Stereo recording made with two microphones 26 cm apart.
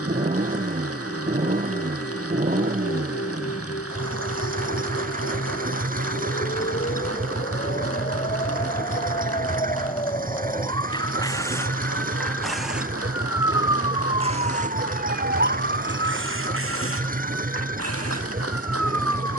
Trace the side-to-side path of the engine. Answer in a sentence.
In this clip you hear the engine stay put.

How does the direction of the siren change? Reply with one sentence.
In this clip you hear the siren move to the right.